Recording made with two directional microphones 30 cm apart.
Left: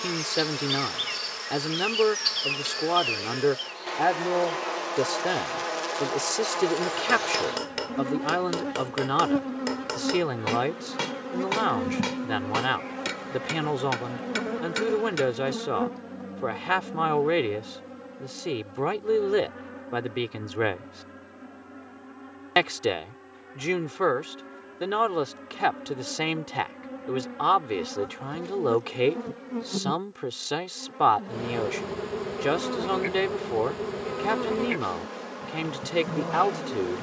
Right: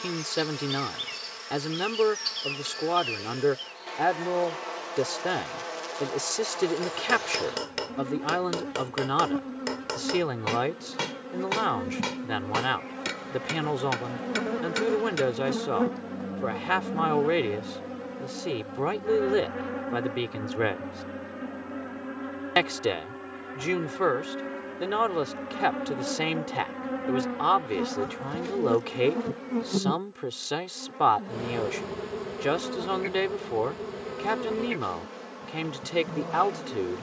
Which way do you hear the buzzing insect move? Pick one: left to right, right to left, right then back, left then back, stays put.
right then back.